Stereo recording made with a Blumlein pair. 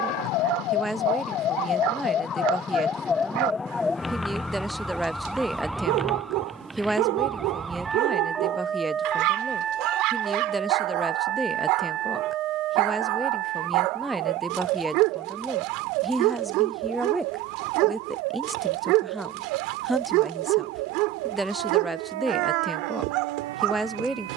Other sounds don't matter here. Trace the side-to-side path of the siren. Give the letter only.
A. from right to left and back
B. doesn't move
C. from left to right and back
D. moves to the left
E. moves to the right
E.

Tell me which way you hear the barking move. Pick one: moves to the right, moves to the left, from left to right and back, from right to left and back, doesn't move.
doesn't move.